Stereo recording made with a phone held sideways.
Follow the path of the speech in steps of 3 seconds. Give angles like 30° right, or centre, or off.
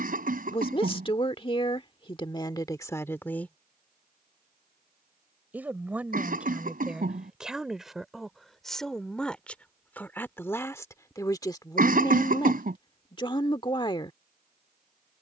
30° left, centre, centre, 10° left, 30° left.